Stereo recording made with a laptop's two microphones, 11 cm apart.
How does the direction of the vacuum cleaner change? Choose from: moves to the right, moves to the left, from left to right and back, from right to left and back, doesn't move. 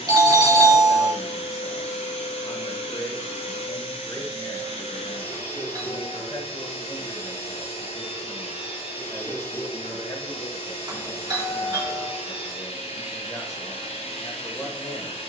doesn't move.